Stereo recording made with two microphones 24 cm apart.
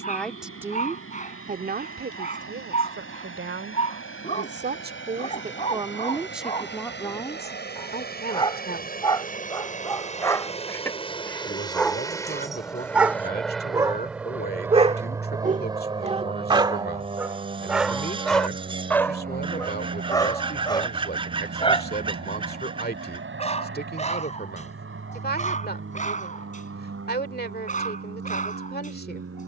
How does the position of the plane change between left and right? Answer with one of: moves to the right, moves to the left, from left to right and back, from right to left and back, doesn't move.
moves to the right.